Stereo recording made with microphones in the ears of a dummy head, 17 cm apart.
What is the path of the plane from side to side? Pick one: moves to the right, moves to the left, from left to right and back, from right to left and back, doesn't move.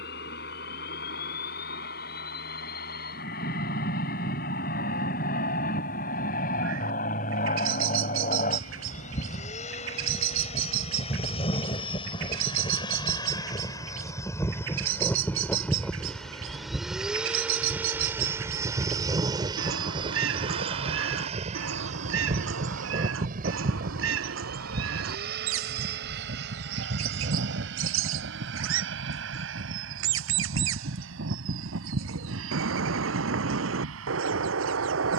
moves to the right.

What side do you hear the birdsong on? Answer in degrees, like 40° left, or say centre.
70° right.